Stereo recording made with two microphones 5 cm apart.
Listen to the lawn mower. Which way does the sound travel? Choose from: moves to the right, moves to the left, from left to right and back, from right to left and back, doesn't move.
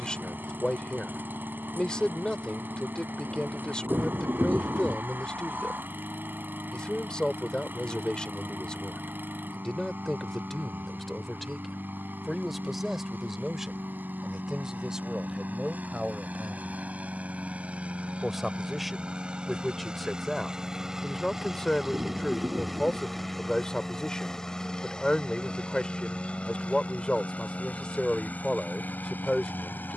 moves to the left.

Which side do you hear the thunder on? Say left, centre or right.
right.